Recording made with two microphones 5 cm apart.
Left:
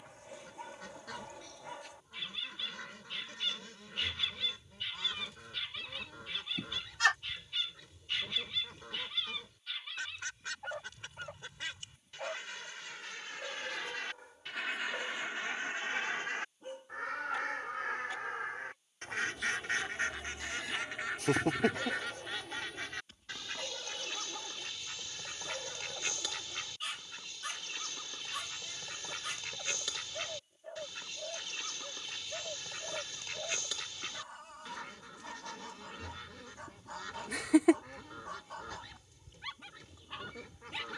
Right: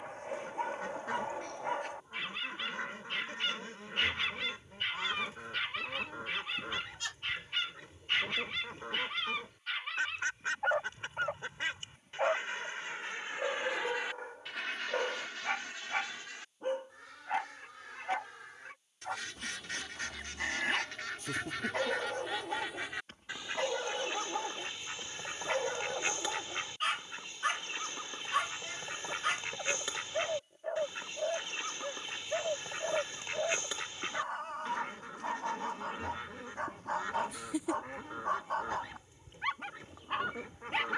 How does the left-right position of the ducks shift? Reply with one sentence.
In this clip you hear the ducks move from right to left and back again.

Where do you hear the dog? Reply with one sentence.
In this clip you hear the dog on the right.